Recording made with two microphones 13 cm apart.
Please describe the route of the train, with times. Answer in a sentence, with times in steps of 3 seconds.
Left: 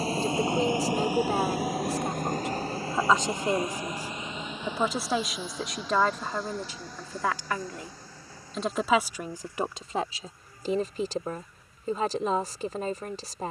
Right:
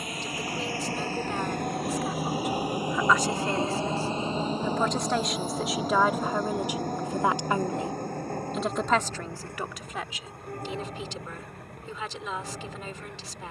In this clip you hear the train in the centre from 0 s and on the right from 3 s.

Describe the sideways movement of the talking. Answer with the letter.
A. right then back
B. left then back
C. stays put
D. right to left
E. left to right
A.